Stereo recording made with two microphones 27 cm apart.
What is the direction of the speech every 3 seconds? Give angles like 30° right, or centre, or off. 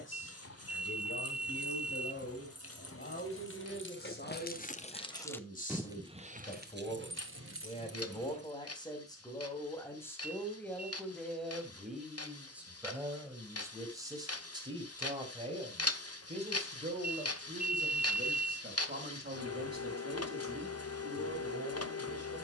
50° left, 40° left, 20° left, 10° left, 10° right, 30° right, 40° right, 50° right.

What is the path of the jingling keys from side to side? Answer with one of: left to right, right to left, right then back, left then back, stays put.
left to right.